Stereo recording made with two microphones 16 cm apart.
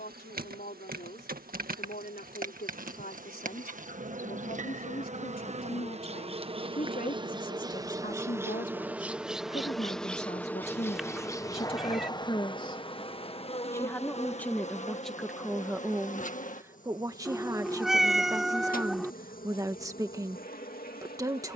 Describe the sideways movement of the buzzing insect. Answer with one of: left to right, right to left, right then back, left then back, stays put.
right to left.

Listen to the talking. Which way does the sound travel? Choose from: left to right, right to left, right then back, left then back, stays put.
left to right.